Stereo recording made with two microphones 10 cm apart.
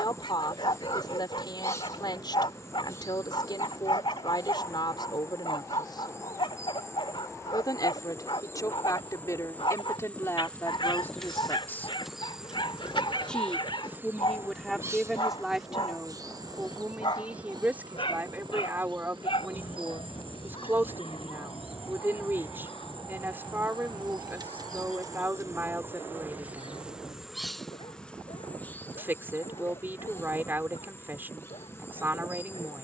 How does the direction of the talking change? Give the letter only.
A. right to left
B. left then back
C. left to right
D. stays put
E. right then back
C.